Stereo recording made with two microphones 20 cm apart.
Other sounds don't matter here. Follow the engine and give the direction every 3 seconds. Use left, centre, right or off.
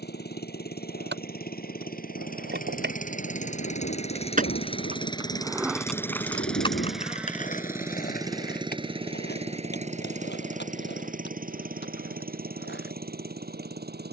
left, left, centre, right, right.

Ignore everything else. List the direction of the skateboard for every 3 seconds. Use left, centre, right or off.
right, right, left, left, left.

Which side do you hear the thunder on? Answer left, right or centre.
left.